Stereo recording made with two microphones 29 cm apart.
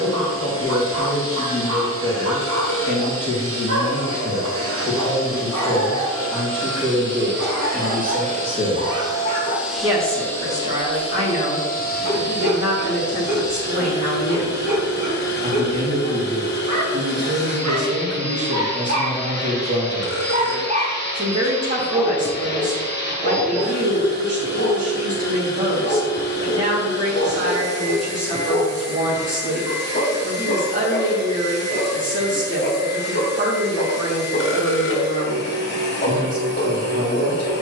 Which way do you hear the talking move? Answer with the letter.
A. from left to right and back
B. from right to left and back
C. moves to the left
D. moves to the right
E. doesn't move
D.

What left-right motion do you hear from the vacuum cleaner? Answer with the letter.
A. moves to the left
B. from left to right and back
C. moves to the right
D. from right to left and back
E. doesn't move
A.